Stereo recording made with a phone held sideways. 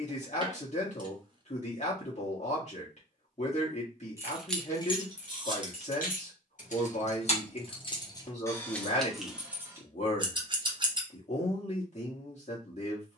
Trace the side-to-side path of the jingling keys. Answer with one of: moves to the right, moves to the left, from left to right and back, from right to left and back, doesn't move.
from right to left and back.